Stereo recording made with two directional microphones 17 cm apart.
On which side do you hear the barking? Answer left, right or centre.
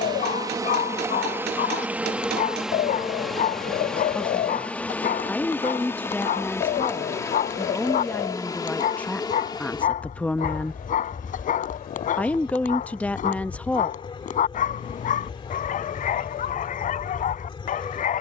left.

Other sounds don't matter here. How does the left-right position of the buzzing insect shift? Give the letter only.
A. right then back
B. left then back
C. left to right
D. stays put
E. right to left
E.